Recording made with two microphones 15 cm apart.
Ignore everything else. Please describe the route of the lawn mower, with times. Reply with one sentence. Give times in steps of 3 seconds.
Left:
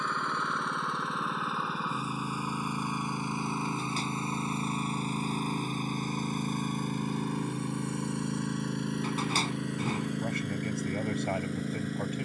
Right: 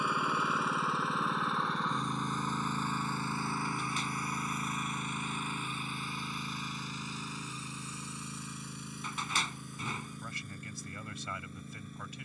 You can hear the lawn mower in the centre from 0 s and on the left from 3 s.